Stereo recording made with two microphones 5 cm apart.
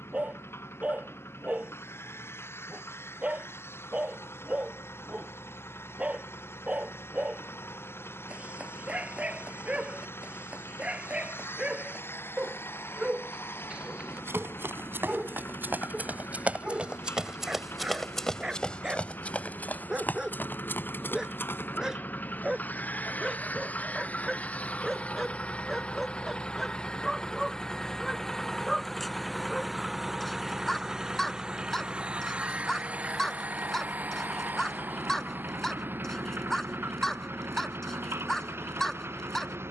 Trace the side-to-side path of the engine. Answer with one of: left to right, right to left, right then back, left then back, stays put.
left to right.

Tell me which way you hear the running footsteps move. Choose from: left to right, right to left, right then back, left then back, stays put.
right to left.